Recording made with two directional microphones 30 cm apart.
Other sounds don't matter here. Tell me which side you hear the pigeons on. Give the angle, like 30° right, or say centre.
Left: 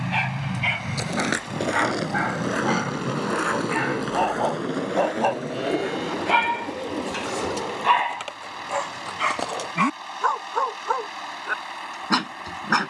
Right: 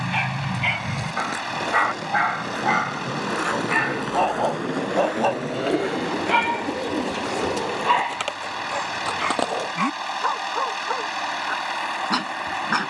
30° right.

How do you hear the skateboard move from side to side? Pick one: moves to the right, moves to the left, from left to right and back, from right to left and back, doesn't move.
moves to the right.